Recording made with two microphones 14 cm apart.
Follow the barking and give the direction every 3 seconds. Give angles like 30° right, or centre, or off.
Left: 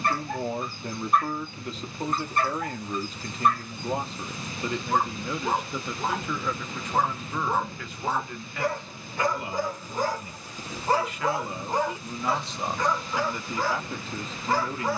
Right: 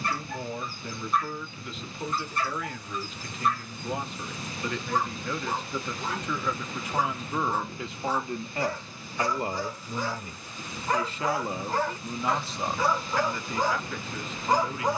60° left, 60° left, 60° left, 40° left, 10° right.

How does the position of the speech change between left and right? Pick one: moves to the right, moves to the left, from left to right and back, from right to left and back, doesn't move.
from left to right and back.